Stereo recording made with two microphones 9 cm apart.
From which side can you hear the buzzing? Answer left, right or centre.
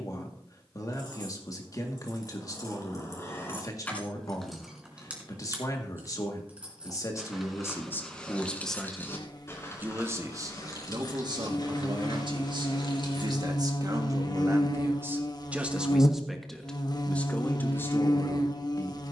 left.